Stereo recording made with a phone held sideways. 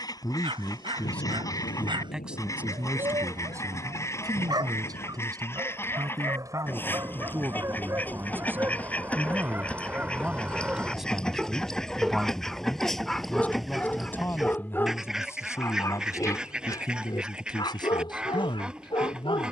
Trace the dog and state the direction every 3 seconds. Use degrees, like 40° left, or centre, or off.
30° right, 30° right, 20° right, 10° right, 10° left, 20° left, 40° left.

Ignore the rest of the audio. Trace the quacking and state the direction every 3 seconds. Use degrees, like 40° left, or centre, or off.
20° left, 20° left, 10° left, 10° left, centre, centre, 10° right.